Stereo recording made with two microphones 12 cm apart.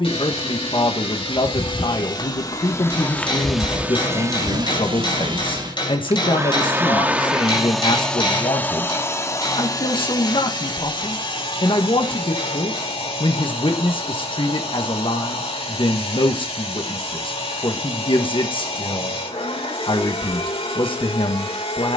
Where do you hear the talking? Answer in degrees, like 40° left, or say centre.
40° left.